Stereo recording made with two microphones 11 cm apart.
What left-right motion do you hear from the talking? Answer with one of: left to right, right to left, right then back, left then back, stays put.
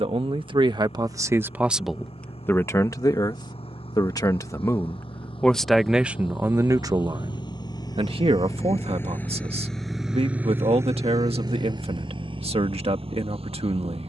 left then back.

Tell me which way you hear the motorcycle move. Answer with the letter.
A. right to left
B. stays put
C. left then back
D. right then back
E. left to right
E.